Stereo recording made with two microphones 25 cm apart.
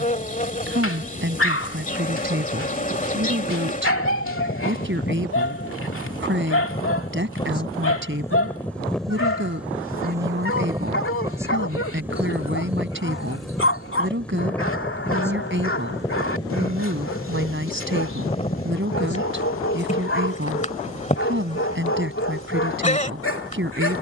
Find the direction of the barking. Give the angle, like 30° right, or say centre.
60° left.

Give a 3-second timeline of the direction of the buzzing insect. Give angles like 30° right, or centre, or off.
30° left, 30° left, 20° left, 10° right, centre, 10° left, 30° left, 30° left.